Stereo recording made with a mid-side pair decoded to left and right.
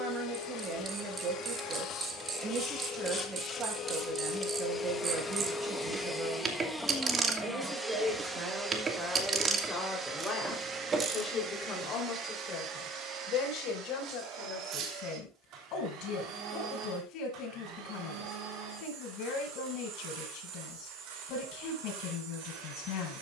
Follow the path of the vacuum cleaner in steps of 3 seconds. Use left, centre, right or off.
left, left, centre, right, right, right, right, right.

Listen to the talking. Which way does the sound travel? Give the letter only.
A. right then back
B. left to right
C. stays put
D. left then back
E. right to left
E.